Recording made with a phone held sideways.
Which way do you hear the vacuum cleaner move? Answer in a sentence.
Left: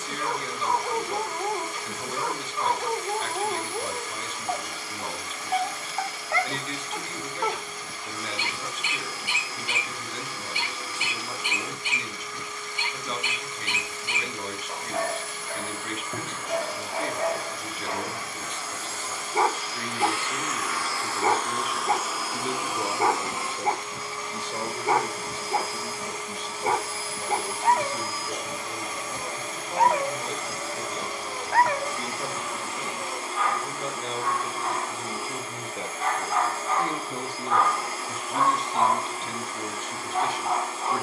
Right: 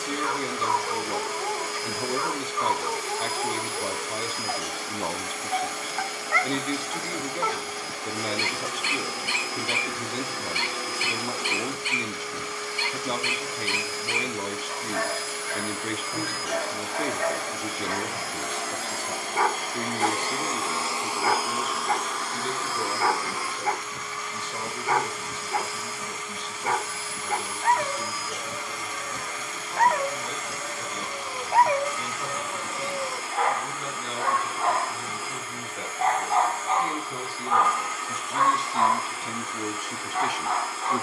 You can hear the vacuum cleaner move to the left.